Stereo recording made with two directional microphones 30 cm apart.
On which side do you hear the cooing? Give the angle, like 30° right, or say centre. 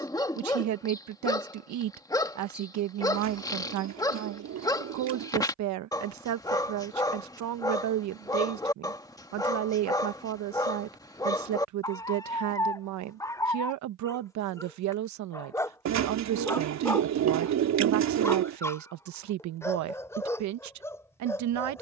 60° right.